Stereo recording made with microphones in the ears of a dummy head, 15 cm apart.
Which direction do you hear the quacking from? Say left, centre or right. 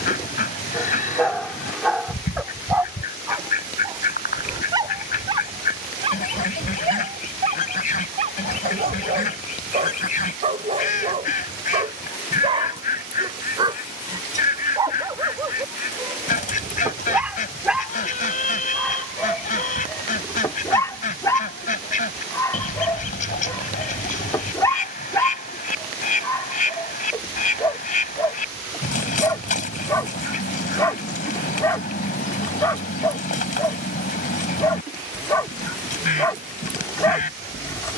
left.